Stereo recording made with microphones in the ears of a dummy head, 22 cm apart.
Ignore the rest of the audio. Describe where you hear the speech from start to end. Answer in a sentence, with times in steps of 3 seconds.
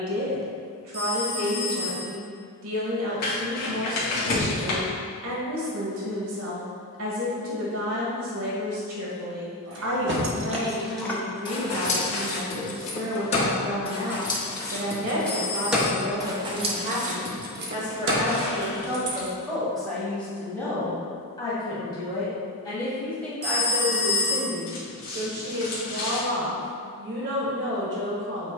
You can hear the speech on the right from 0 s, in the centre from 18 s and on the right from 24 s.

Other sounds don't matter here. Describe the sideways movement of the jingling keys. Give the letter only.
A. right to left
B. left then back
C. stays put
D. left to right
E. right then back
B.